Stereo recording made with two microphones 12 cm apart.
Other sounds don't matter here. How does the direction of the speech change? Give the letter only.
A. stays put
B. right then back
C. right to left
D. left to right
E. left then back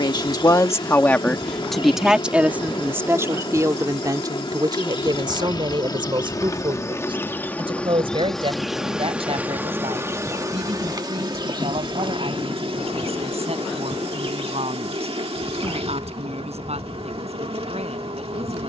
D.